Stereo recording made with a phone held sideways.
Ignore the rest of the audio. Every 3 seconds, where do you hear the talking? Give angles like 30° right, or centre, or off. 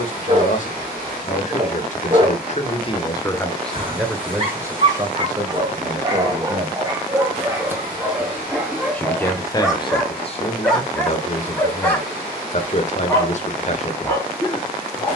50° left, 10° right, 20° right, 40° left, 50° left.